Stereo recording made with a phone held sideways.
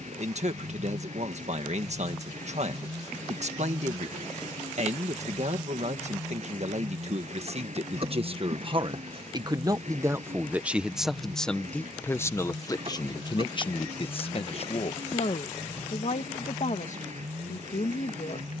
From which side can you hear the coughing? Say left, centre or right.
right.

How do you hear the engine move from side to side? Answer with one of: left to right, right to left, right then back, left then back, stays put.
stays put.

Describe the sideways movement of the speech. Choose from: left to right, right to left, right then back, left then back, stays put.
right to left.